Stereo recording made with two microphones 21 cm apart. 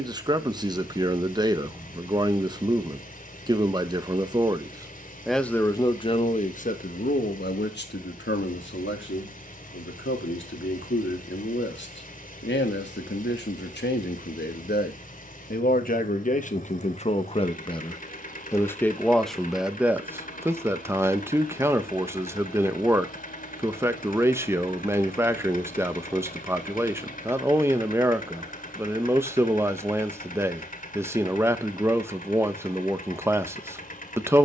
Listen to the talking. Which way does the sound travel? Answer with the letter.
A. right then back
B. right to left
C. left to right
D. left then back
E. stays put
D.